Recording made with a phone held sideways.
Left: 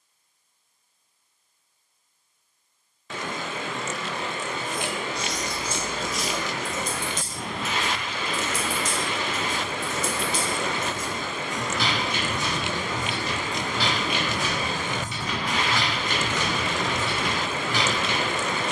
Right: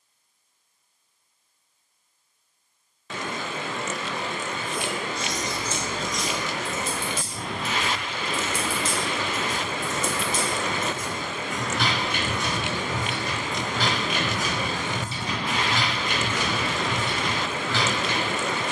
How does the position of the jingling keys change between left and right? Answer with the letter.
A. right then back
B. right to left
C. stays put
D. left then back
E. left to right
A.